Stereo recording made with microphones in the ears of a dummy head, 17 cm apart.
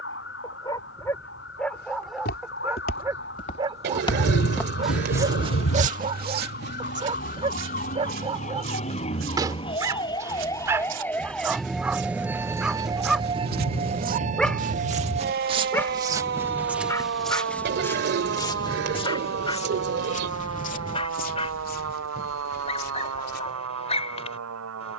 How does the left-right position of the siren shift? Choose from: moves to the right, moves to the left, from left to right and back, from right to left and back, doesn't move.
moves to the right.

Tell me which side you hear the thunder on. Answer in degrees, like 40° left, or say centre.
90° left.